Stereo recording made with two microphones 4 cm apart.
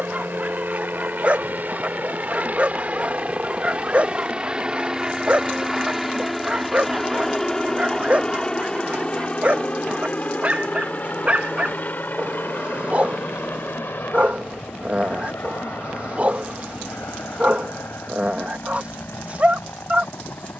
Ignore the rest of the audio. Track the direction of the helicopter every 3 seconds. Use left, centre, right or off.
right, right, centre, left, left, left, left.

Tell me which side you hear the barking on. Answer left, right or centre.
right.